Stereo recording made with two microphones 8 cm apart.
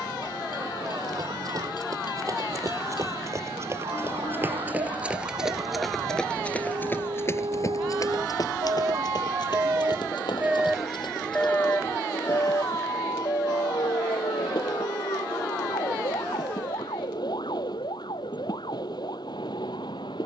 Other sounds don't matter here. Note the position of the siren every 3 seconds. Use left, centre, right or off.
right, right, right, centre, left, left, left.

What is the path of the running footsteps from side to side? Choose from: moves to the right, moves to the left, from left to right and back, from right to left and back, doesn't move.
moves to the left.